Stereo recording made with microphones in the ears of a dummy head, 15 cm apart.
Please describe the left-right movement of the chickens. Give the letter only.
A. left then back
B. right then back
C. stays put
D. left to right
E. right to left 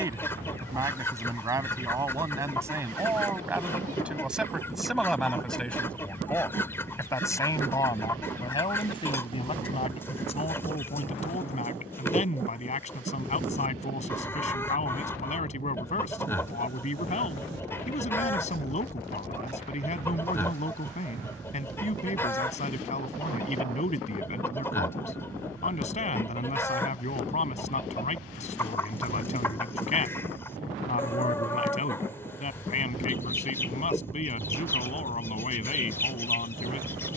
C.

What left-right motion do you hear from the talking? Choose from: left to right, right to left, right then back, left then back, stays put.
right to left.